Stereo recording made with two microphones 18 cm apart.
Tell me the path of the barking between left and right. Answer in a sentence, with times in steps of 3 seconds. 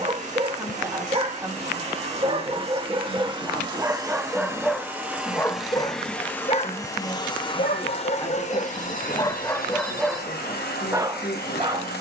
You can hear the barking on the right from 0 s, in the centre from 3 s, on the left from 6 s and in the centre from 9 s.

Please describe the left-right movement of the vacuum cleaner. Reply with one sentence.
You can hear the vacuum cleaner go from the right side to the left.